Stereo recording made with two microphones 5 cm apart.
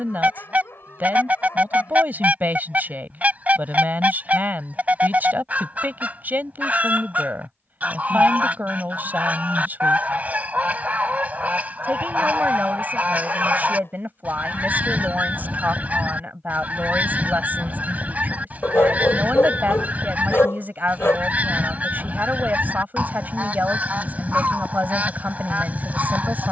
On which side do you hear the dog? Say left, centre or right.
left.